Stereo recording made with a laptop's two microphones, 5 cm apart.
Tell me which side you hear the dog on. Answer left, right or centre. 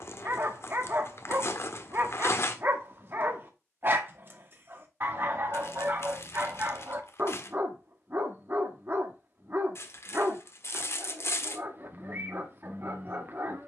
right.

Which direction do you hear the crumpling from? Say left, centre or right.
left.